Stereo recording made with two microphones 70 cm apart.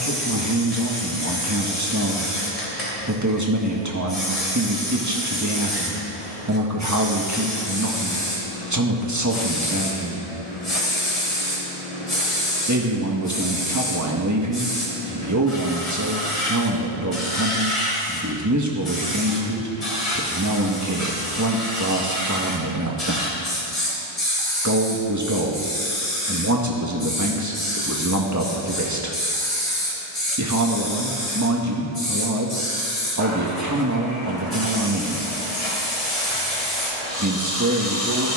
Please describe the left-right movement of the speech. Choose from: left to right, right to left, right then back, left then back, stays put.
stays put.